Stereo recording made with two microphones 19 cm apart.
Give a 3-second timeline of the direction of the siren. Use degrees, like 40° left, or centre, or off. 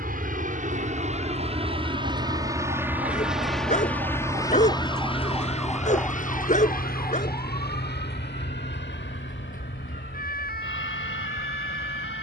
60° right, 20° right, 20° left, 50° left.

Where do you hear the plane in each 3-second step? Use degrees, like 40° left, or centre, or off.
30° right, 20° left, 50° left, 60° left.